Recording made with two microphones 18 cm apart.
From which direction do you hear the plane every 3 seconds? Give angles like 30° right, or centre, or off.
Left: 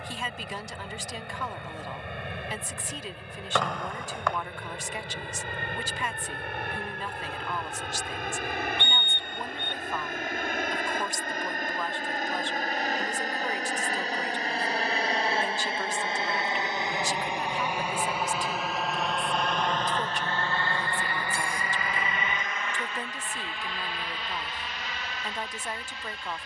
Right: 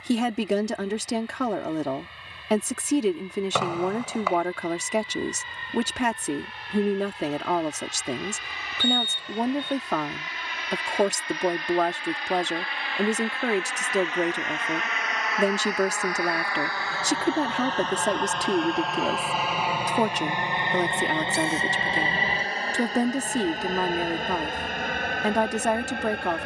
70° left, 70° left, 60° left, 50° left, 40° left, 20° left, 10° right, 30° right, 50° right.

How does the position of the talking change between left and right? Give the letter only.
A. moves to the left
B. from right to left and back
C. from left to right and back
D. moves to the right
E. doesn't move
E.